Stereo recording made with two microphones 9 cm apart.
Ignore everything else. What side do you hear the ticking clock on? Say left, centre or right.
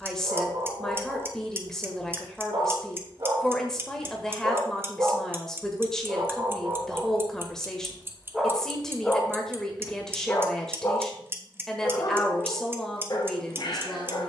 right.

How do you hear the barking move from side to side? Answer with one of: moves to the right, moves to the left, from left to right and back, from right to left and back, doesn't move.
moves to the left.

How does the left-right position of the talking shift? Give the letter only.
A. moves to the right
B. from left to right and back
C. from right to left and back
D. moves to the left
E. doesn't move
E.